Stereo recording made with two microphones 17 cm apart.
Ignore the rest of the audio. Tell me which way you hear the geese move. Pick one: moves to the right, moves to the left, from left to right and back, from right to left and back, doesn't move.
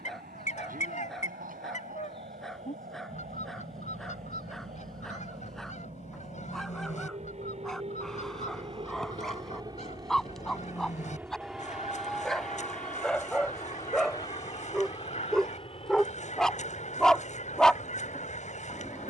doesn't move.